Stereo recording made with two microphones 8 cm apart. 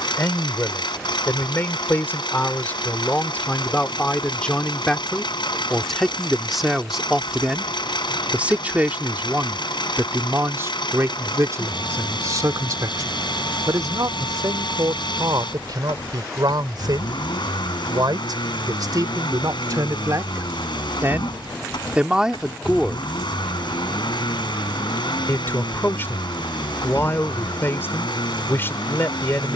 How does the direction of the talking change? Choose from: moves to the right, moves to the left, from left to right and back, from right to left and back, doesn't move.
from left to right and back.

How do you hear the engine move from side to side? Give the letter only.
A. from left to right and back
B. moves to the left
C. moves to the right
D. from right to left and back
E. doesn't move
E.